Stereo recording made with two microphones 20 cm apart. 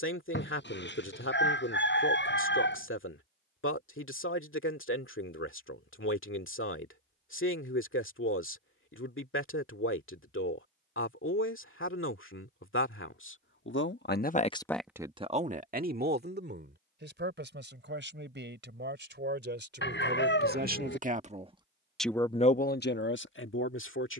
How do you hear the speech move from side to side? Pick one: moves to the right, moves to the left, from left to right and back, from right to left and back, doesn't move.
from left to right and back.